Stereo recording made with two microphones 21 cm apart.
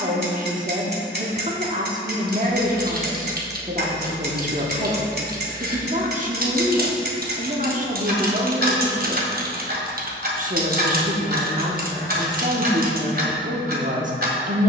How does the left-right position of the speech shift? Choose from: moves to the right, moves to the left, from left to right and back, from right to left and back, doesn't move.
doesn't move.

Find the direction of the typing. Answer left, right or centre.
right.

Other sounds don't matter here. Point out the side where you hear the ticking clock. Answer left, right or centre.
right.